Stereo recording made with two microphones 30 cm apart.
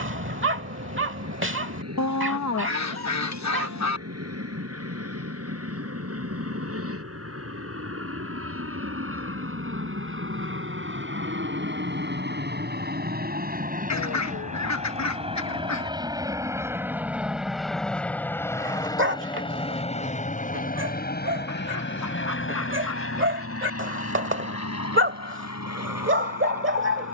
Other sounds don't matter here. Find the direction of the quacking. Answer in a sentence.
You can hear the quacking on the left.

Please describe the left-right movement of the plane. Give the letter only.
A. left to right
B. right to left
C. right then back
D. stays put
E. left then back
B.